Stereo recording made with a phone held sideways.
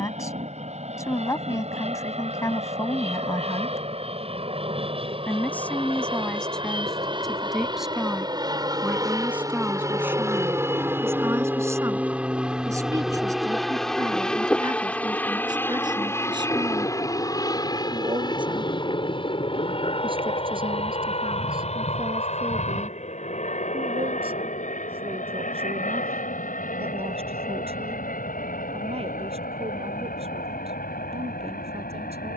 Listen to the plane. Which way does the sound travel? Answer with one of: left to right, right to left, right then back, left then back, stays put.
right to left.